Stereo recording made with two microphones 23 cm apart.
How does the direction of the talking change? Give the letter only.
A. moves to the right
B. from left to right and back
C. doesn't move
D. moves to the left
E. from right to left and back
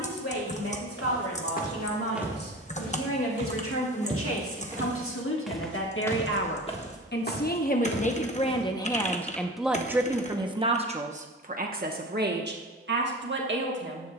A.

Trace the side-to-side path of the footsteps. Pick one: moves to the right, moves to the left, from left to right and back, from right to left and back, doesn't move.
from left to right and back.